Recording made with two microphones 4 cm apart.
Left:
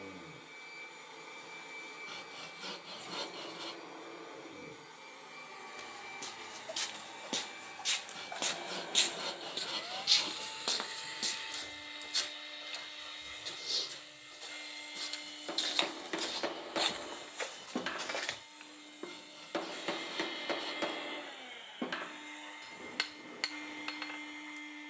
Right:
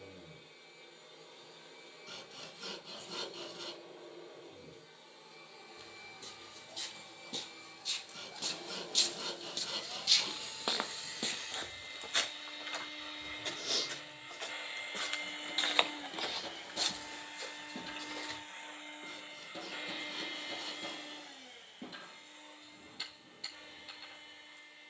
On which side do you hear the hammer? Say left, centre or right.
left.